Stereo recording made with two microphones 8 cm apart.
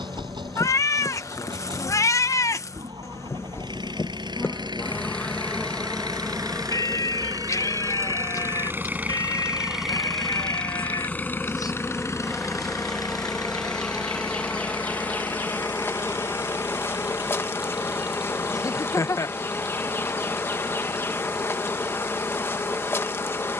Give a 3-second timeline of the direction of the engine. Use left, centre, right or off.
right, right, right, centre, left, left, left, left.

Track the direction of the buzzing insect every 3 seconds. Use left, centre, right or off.
left, left, centre, centre, centre, left, left, left.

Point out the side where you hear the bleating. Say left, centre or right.
left.